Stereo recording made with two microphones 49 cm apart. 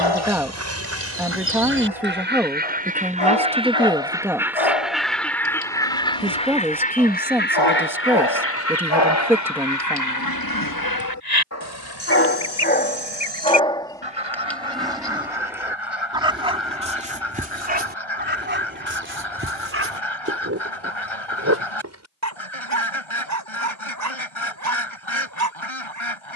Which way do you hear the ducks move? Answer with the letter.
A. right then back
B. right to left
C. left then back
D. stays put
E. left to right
B.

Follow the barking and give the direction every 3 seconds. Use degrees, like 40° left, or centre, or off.
80° left, 80° left, 60° left, 40° left, 10° left, 10° right, 20° right, 30° right, 30° right.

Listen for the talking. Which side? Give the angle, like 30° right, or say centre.
centre.